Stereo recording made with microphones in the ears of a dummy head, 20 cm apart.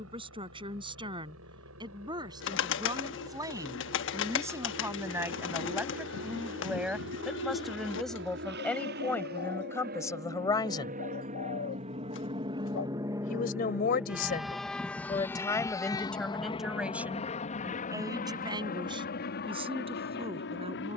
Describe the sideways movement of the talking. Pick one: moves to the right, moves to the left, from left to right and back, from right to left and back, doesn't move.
from right to left and back.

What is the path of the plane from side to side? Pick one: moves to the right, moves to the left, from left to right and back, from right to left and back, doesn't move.
moves to the left.